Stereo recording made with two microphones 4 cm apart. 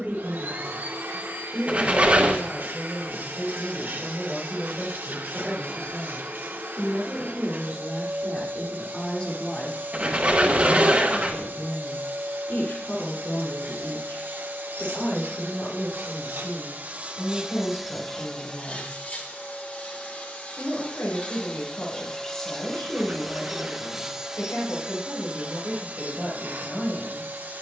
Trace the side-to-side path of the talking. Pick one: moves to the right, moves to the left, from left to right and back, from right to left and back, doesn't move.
moves to the left.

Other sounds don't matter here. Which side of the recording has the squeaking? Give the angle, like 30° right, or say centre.
30° right.